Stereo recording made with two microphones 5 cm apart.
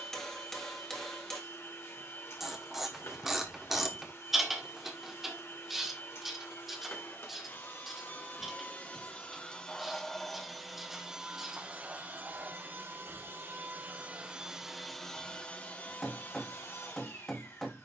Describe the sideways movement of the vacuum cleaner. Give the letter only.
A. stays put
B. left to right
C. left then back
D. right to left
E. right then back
E.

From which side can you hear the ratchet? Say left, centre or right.
centre.